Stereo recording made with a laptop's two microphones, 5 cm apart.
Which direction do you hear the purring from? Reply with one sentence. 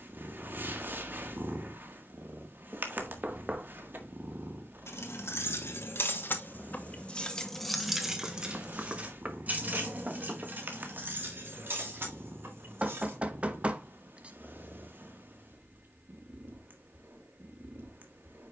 You can hear the purring on the right.